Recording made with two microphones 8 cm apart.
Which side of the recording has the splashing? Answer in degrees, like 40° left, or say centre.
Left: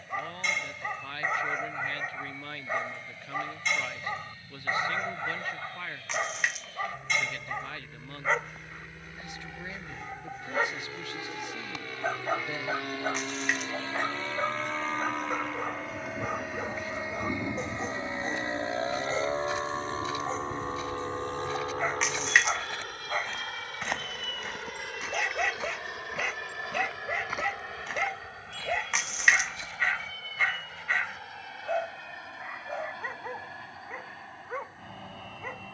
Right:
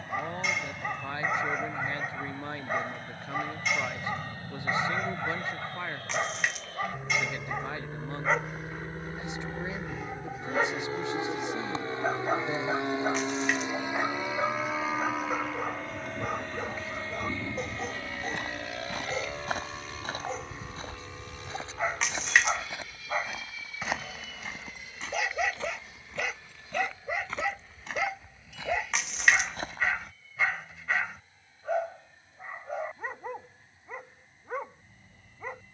centre.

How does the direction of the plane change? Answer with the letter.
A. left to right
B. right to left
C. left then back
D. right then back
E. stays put
B.